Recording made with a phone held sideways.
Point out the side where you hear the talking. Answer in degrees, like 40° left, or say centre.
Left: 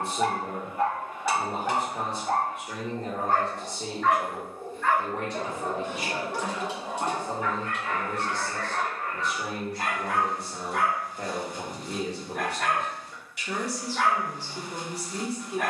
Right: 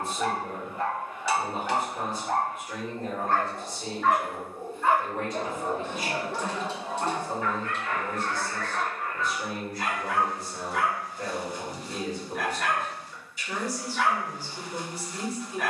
70° left.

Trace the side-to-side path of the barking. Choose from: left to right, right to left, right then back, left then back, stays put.
right then back.